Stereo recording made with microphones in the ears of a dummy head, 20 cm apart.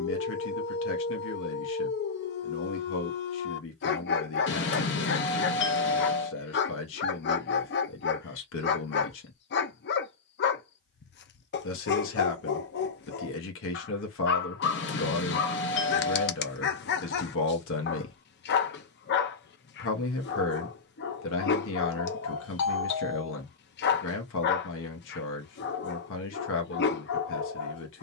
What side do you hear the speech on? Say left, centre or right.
left.